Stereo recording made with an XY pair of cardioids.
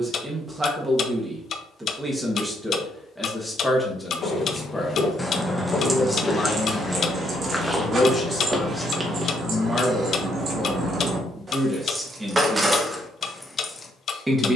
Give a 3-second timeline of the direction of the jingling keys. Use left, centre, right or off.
off, centre, right, right, centre.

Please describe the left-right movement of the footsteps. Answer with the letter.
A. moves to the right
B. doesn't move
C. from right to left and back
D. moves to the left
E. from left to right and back
A.